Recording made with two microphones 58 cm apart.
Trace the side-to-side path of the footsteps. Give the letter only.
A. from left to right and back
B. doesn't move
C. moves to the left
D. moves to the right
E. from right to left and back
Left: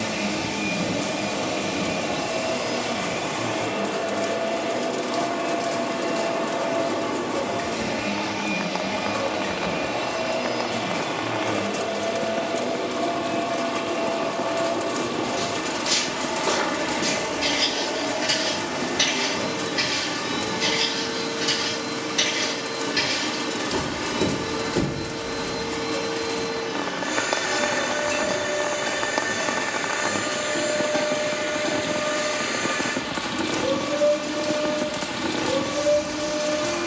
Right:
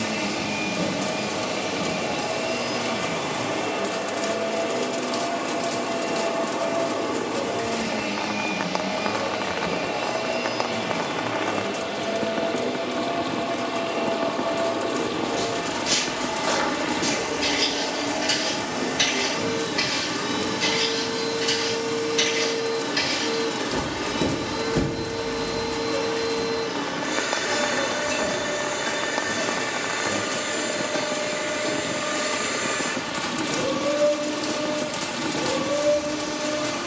E.